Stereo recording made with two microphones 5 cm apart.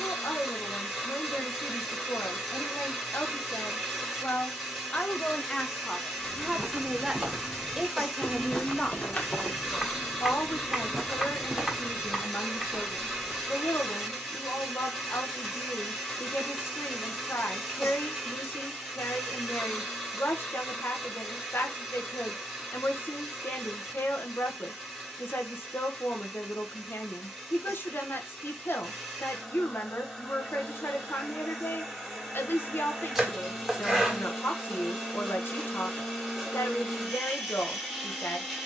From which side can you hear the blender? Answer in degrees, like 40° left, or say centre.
centre.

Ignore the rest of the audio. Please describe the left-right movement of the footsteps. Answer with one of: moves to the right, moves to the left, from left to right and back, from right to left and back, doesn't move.
from right to left and back.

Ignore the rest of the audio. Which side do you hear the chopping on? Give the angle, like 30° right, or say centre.
10° right.